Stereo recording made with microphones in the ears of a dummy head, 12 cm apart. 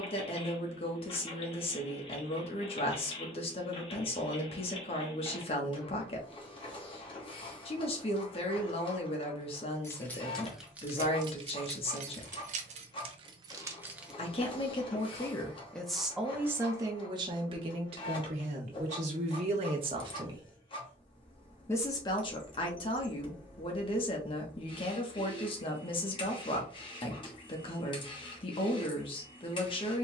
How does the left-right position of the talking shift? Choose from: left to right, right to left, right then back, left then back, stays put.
right then back.